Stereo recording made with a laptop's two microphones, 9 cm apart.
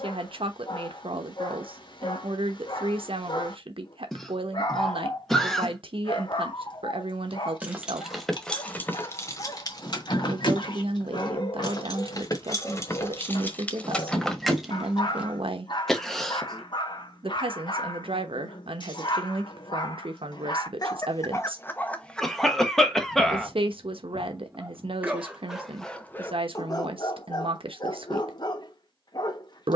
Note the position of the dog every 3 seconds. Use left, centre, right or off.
left, left, left, left, left, left, left, centre, centre, left.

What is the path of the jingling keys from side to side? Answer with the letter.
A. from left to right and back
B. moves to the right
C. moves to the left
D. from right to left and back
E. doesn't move
D.